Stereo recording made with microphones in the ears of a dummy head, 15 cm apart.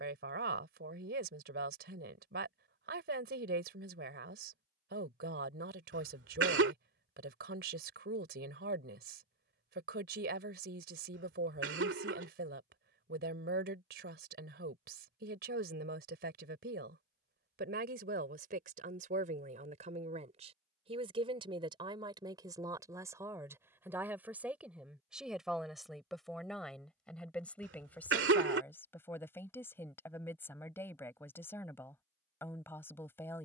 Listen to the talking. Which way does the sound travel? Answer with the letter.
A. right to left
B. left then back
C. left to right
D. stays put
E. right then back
A.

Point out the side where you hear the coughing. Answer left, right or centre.
right.